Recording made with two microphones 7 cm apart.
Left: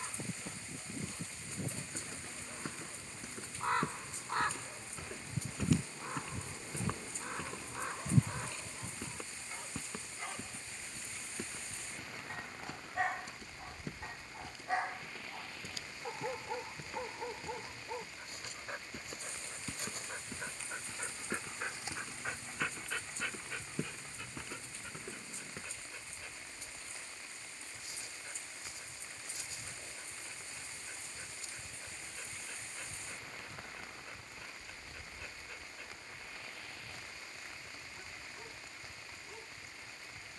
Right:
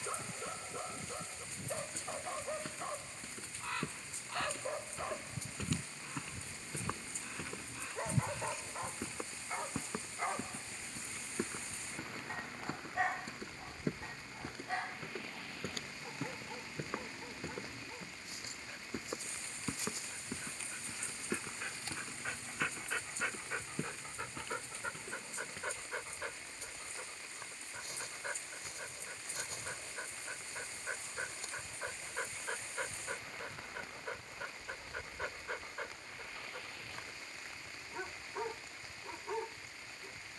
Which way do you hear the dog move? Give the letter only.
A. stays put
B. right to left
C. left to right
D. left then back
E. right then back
D.